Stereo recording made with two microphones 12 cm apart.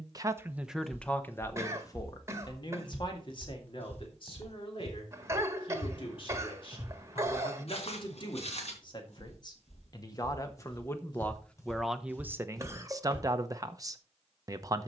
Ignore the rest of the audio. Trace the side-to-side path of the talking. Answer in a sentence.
You can hear the talking move from right to left and back again.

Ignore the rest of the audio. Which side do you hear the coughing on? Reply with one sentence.
In this clip you hear the coughing on the right.